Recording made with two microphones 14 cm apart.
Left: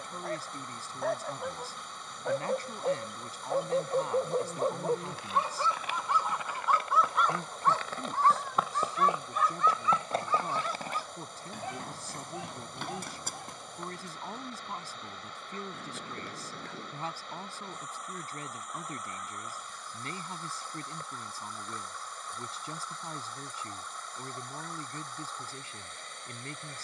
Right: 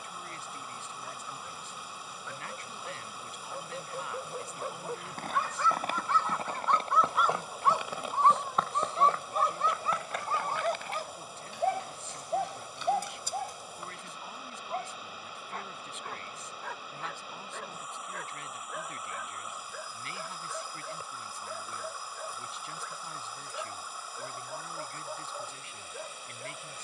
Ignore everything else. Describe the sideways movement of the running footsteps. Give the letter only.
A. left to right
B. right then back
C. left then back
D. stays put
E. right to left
E.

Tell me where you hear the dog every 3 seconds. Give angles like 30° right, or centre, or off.
60° left, 40° left, 10° right, 40° right, 60° right, 60° right, 70° right, 70° right, 70° right.